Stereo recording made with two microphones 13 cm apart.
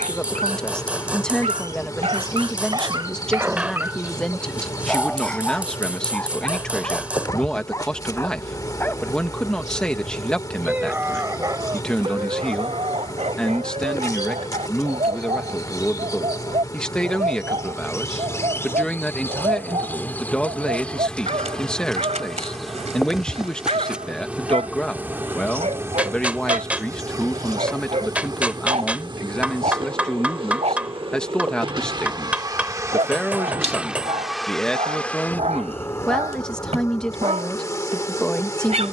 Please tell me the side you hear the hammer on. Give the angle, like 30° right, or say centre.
10° right.